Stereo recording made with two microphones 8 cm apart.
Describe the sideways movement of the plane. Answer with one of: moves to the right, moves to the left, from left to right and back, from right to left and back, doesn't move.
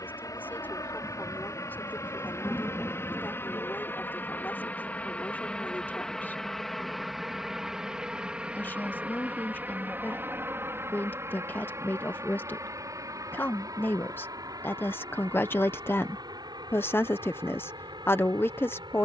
moves to the right.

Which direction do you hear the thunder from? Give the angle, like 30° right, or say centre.
20° left.